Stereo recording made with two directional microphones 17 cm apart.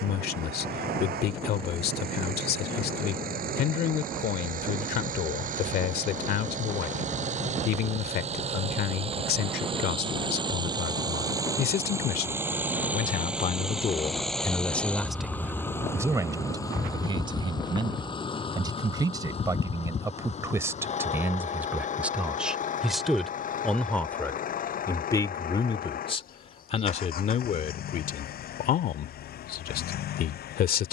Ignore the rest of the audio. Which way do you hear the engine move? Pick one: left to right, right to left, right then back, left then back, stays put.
right to left.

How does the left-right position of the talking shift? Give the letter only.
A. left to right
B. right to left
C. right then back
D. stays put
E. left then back
C.